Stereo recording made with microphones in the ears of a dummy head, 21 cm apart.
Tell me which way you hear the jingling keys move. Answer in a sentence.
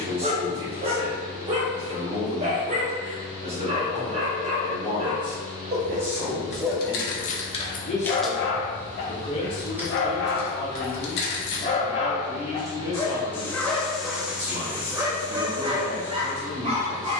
You can hear the jingling keys move from left to right and back again.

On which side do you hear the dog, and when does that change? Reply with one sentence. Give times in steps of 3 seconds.
You can hear the dog on the right from 0 s, in the centre from 6 s, on the left from 9 s, in the centre from 12 s and on the right from 15 s.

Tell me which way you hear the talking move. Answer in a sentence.
You can hear the talking go left and come back.